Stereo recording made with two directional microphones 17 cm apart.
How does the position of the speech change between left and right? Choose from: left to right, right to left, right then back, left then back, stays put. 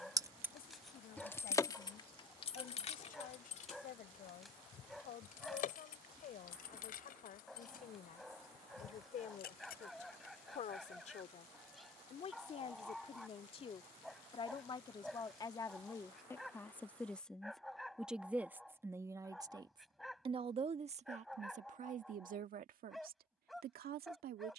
left to right.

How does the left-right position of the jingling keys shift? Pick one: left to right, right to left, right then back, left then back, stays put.
right to left.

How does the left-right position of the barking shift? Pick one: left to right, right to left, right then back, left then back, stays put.
stays put.